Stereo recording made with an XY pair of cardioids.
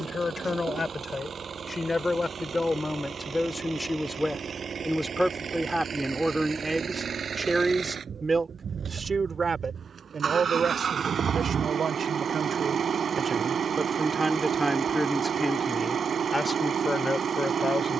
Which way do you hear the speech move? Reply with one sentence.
You can hear the speech go right and come back.